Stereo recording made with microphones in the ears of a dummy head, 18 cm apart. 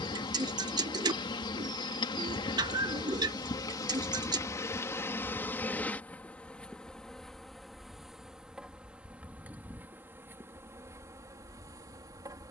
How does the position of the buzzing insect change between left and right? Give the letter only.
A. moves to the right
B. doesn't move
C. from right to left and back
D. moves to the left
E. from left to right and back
A.